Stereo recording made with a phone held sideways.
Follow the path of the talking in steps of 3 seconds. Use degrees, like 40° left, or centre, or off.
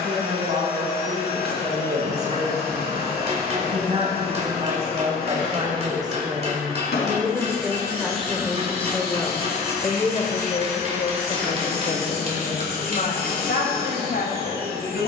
50° right, 40° right, 10° right, 40° left, 60° left.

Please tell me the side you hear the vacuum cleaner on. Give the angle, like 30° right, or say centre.
80° left.